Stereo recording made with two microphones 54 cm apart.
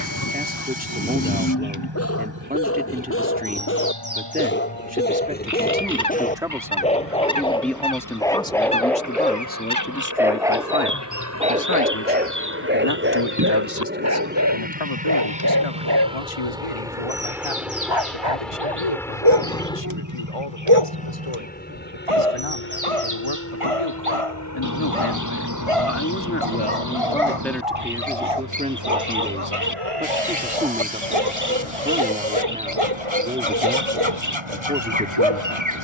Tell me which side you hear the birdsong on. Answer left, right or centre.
right.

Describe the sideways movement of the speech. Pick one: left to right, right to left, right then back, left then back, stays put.
left then back.